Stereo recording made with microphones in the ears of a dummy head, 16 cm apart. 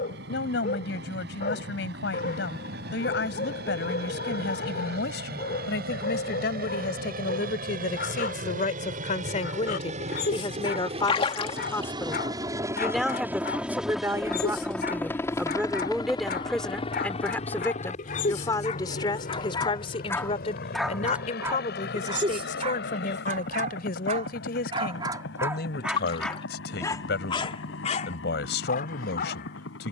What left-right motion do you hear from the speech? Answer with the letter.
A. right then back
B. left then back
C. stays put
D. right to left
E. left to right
A.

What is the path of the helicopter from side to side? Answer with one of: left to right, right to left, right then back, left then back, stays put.
right to left.